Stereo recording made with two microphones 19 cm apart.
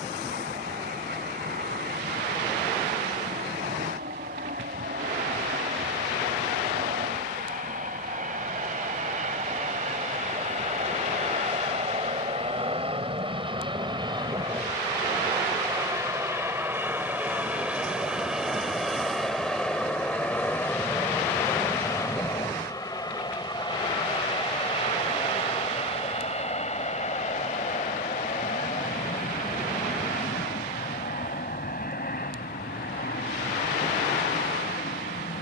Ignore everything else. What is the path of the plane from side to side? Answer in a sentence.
You can hear the plane move to the left.